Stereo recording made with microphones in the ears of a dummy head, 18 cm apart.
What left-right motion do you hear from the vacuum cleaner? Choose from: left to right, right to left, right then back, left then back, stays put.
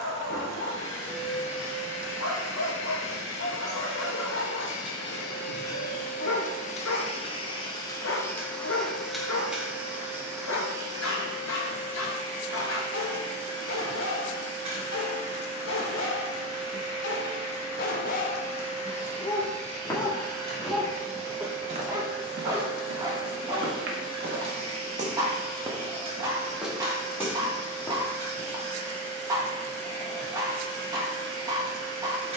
left to right.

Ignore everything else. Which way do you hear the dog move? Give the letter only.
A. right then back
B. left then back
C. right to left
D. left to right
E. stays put
D.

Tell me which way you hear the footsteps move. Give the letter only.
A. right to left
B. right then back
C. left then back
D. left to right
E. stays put
B.